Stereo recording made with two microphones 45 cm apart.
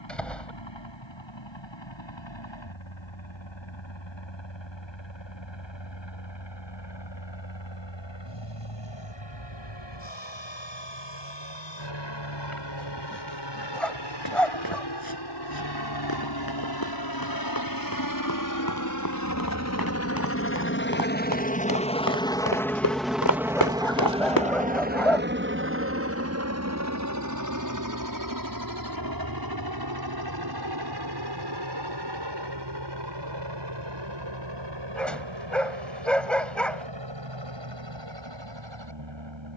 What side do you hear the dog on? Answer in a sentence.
In this clip you hear the dog in the centre.